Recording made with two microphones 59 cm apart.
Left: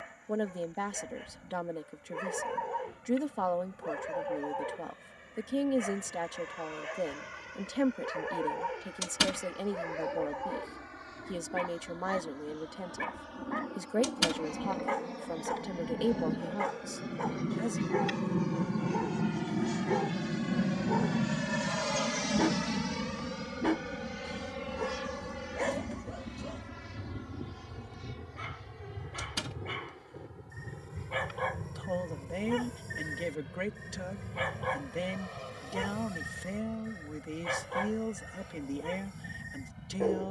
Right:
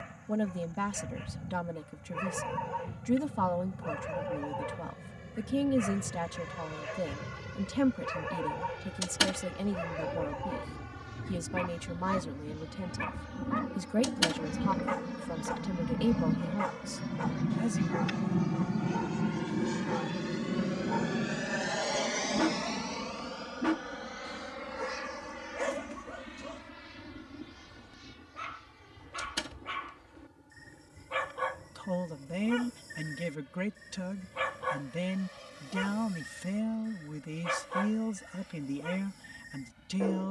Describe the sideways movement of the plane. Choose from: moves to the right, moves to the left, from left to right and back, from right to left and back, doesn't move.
moves to the left.